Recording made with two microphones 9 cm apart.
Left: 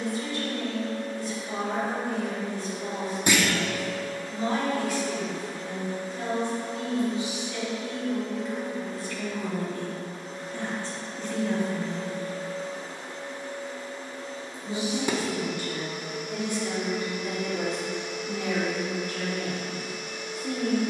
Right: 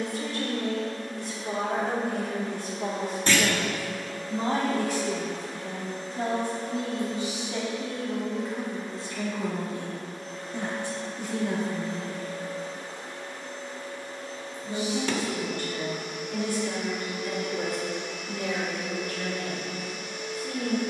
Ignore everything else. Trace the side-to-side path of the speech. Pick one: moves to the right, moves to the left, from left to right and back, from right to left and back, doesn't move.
moves to the left.